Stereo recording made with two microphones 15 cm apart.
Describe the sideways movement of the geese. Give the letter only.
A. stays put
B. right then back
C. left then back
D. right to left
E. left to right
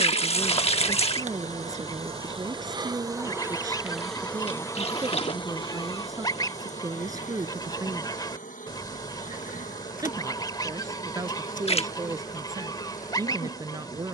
A.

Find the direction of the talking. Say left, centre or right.
right.